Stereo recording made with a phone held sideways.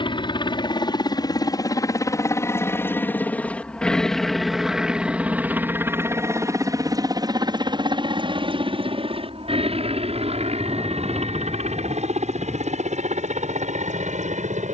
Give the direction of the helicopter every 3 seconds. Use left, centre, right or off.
left, centre, right, right, right.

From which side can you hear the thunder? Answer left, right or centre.
centre.